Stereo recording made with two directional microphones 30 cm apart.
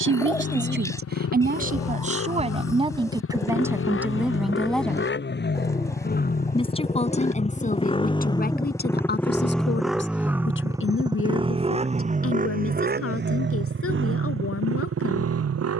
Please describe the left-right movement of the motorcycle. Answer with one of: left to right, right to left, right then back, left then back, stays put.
left to right.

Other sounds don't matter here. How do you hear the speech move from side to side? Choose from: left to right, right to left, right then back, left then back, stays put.
right to left.